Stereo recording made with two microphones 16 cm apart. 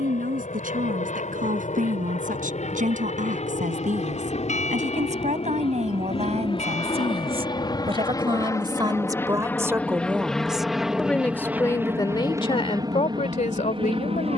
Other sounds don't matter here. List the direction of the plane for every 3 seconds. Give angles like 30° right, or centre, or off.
50° left, 40° left, 30° left, centre, 30° right.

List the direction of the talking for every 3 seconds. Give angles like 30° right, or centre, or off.
60° right, 50° right, 40° right, centre, 40° left.